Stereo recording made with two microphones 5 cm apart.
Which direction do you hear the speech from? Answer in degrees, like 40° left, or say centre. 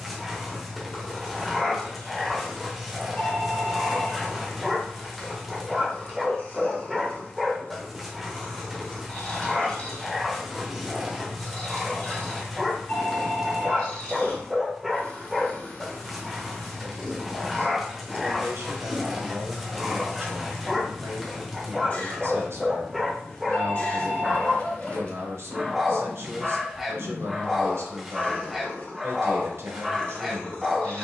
70° right.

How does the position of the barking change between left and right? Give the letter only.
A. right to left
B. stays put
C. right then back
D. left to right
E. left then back
B.